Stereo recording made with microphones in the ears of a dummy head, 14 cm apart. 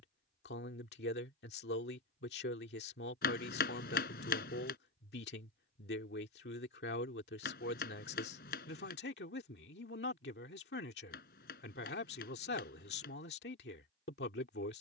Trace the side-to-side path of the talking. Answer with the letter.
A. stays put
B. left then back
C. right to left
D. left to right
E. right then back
A.